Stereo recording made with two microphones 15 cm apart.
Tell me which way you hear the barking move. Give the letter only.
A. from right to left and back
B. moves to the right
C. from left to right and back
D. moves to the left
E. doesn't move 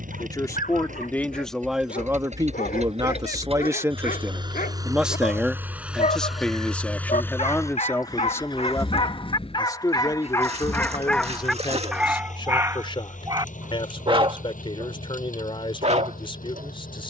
B.